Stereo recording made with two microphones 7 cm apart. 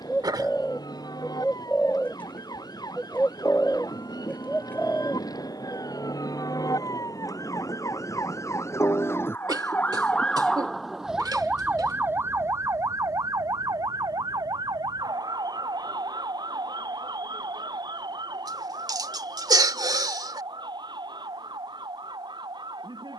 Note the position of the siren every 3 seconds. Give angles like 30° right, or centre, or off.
70° left, 70° left, 50° left, 10° left, 50° right, 70° right, 80° right, 80° right.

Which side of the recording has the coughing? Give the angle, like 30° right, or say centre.
70° right.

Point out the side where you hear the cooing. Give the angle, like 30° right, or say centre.
20° left.